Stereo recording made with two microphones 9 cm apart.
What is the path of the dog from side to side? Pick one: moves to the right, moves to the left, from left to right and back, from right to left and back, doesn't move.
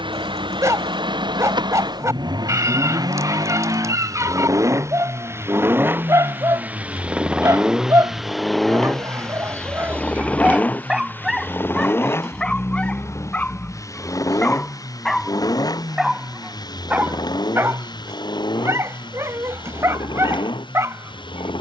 from right to left and back.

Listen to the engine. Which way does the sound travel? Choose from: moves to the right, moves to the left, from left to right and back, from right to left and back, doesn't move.
moves to the left.